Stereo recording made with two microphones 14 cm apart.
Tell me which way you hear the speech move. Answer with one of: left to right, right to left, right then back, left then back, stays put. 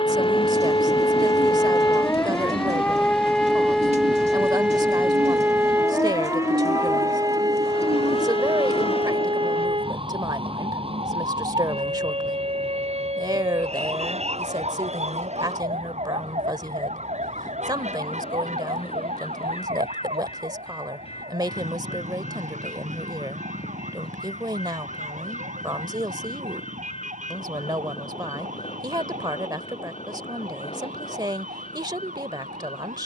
stays put.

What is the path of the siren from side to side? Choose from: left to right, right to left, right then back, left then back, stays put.
left to right.